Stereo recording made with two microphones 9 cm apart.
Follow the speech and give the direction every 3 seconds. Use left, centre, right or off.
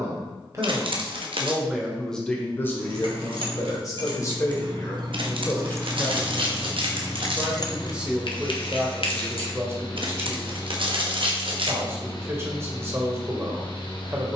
centre, left, centre, right, right.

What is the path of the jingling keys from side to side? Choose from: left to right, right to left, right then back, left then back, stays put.
right to left.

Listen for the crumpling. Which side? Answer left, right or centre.
right.